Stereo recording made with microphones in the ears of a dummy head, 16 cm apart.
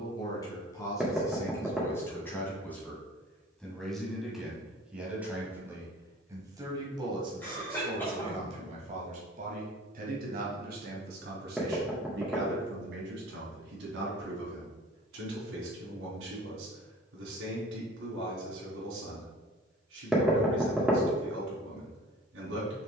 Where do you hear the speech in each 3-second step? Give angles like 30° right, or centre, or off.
20° left, centre, 30° right, 50° right, 70° right, 80° right, 80° right, 80° right.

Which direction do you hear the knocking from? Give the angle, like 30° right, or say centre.
centre.